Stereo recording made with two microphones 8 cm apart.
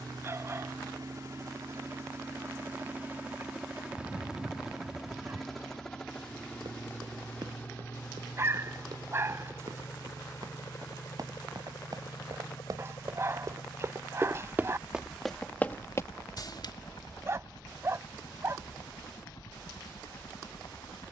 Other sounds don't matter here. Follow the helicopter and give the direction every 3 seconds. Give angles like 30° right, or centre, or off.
40° right, 10° right, 20° left, 30° left, 40° left, 50° left, 50° left.